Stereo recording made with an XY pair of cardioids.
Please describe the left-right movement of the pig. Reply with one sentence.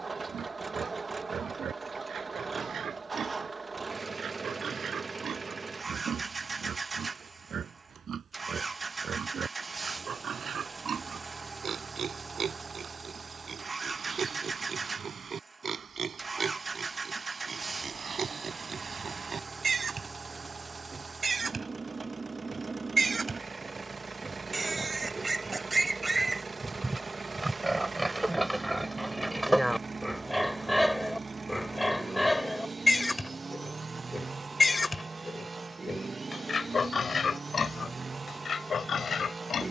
In this clip you hear the pig move to the left.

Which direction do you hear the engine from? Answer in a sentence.
You can hear the engine on the right.